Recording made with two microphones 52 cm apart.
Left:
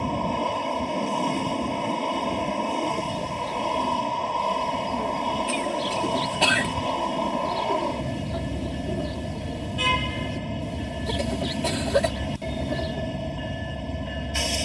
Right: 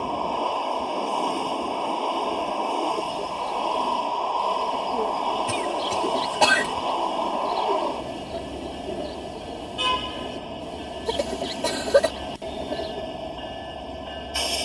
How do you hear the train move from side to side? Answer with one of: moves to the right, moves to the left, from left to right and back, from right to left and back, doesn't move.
doesn't move.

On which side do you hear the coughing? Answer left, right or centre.
right.